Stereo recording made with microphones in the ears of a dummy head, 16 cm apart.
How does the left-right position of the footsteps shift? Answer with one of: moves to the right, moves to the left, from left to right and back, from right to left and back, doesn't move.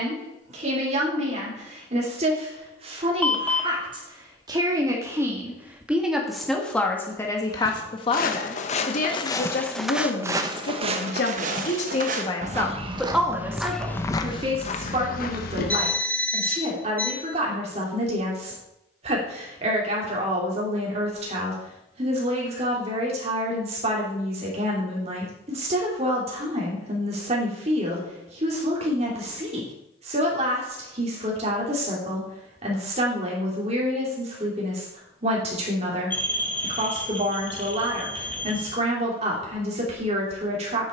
from left to right and back.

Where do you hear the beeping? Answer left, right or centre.
centre.